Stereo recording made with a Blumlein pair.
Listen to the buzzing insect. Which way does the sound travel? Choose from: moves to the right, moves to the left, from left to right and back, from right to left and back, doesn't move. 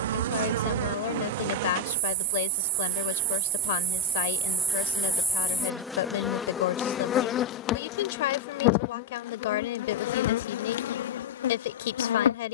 moves to the left.